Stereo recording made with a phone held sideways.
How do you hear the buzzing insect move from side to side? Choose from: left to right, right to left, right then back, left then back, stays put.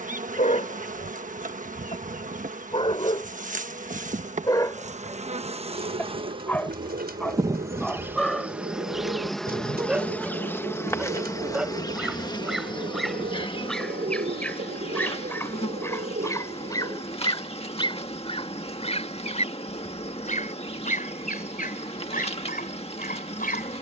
right to left.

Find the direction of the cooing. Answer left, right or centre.
right.